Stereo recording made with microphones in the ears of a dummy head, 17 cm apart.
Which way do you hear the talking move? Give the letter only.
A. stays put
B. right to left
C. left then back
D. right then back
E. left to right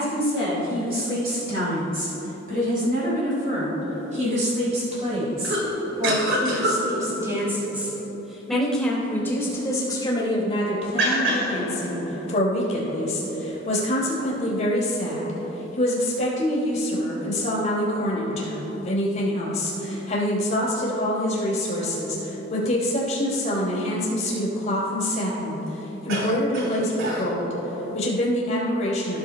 B.